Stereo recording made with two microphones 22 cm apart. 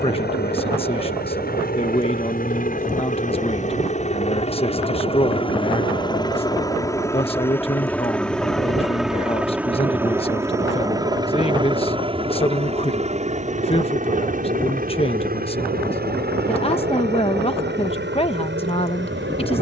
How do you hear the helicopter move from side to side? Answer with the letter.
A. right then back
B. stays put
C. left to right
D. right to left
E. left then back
C.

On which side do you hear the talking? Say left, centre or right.
left.